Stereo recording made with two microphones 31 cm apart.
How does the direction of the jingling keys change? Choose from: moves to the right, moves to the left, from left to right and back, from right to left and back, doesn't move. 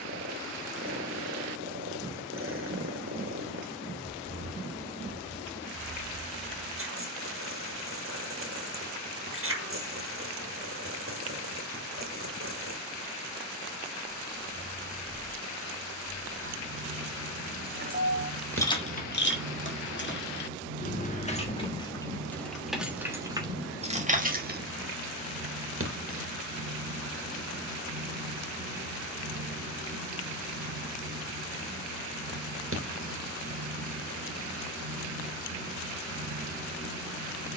from right to left and back.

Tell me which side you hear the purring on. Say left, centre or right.
right.